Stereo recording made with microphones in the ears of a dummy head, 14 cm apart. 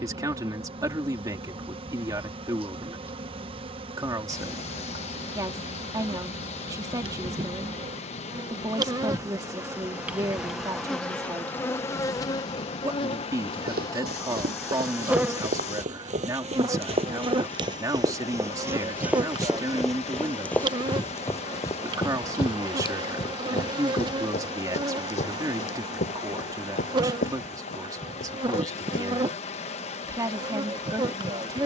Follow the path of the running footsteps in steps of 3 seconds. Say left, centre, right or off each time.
off, off, off, off, right, right, centre, left, left, left, off.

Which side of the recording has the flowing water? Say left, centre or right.
left.